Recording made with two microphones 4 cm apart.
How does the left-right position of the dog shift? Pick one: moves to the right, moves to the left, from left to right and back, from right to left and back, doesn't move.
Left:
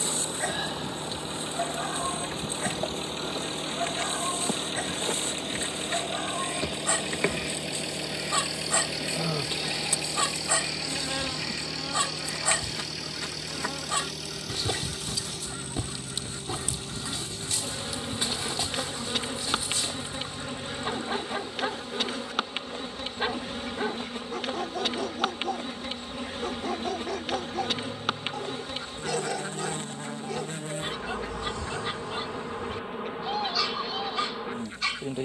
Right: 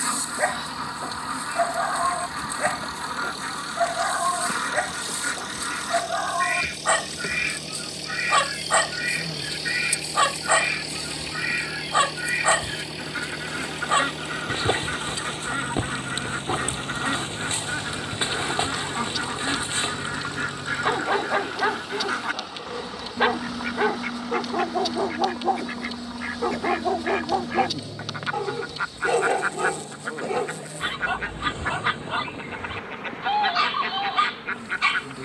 doesn't move.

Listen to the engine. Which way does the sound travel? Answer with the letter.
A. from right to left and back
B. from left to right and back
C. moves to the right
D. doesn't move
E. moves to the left
C.